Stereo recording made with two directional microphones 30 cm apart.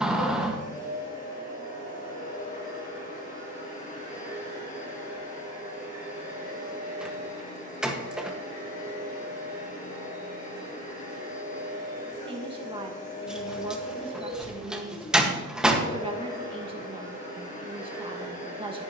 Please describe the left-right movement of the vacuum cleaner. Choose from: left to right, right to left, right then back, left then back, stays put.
stays put.